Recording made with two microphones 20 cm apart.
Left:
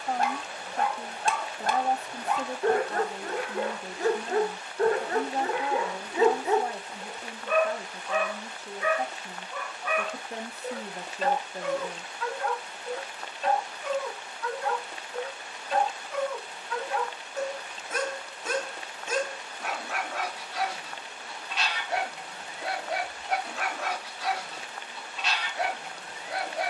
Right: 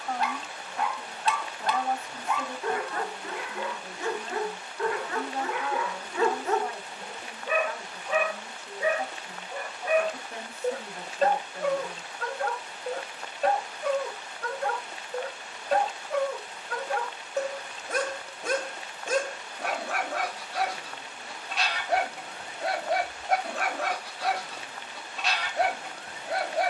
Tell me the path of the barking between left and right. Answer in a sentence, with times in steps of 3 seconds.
In this clip you hear the barking on the left from 0 s, in the centre from 6 s and on the right from 9 s.